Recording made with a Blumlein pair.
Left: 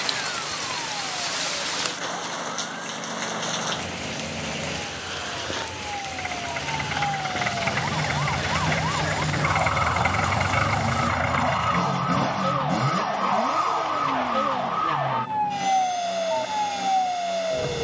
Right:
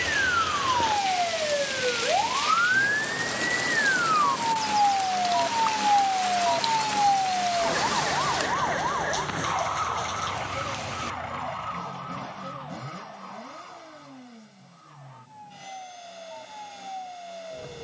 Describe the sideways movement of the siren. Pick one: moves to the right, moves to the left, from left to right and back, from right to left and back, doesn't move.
moves to the left.